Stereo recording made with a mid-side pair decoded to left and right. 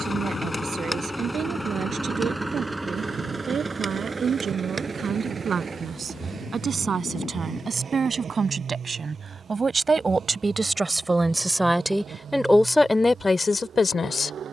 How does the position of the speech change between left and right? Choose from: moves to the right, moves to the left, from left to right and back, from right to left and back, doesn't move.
moves to the left.